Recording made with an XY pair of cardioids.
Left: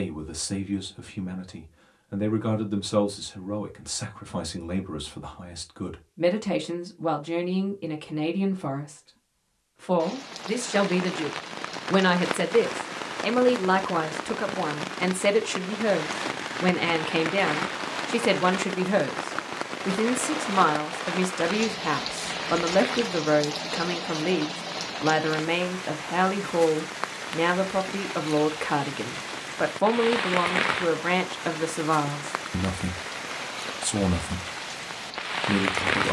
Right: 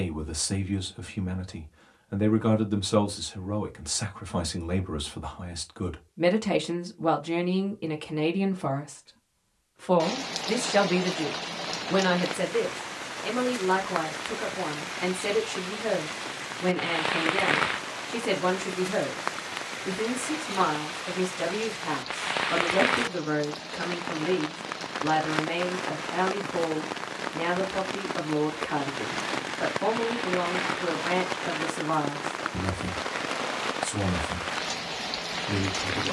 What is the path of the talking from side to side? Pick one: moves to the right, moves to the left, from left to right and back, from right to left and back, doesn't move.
moves to the left.